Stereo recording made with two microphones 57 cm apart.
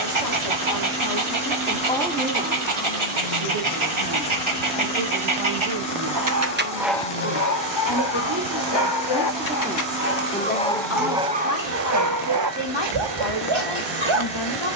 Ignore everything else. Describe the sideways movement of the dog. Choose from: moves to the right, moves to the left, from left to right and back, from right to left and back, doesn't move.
from right to left and back.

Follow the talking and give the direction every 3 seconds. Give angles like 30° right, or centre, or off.
30° left, 50° right, 40° right, 20° left, 50° left.